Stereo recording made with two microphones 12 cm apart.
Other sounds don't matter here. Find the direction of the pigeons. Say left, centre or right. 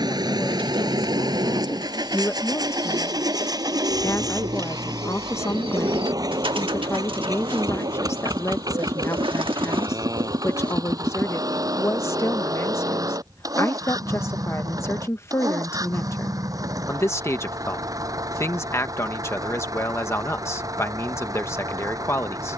right.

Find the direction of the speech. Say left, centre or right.
left.